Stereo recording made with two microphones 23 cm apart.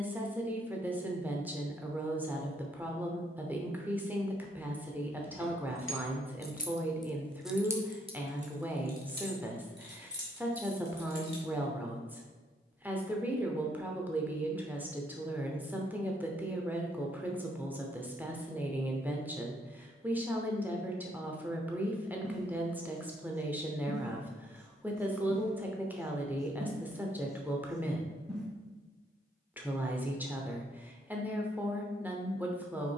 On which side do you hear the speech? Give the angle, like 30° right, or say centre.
10° right.